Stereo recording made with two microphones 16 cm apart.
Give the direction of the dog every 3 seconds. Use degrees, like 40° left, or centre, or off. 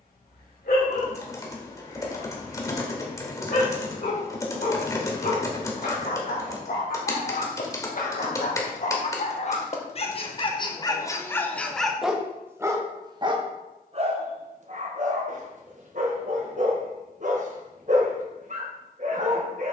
70° left, 70° left, 60° left, 30° left, 30° right, 50° right, 50° right.